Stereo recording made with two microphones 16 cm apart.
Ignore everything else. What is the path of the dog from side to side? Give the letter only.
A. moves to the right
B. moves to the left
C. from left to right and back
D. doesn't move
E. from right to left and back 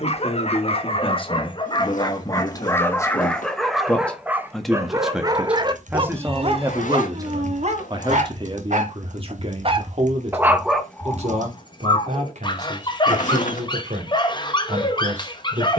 C.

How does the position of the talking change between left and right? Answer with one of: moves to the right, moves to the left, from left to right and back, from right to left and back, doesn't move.
moves to the right.